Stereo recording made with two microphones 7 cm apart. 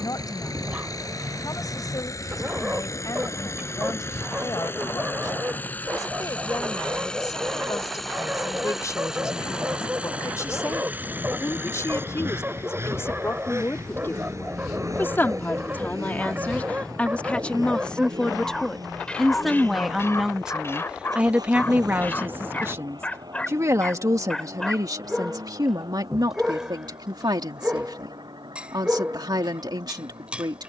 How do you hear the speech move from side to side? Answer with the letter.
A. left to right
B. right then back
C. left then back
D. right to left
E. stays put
A.